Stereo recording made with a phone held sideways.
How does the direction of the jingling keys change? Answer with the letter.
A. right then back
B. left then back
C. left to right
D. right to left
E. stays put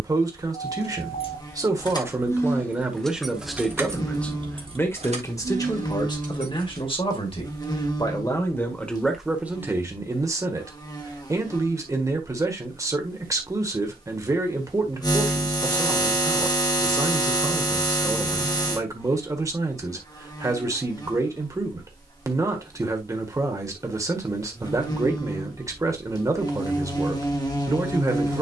C.